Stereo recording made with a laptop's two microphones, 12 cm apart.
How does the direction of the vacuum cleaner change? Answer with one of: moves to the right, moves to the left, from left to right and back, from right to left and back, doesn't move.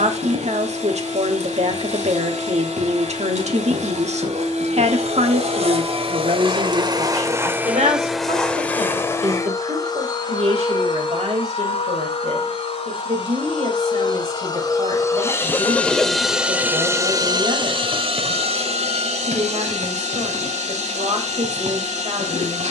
from right to left and back.